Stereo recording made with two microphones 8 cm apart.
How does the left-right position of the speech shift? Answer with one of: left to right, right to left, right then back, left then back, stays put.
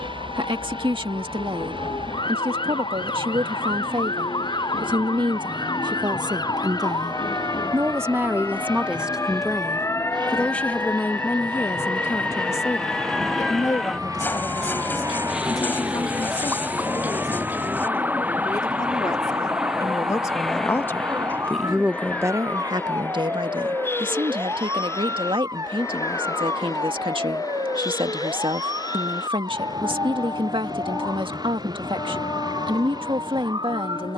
left then back.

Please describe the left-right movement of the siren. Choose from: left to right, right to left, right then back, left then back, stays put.
left to right.